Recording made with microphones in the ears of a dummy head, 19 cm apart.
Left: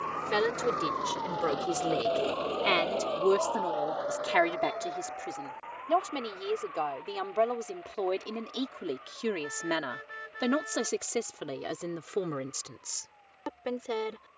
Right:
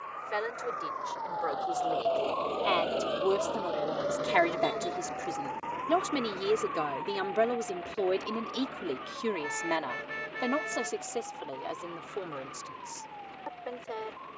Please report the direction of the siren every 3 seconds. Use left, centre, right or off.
left, right, right, right, right.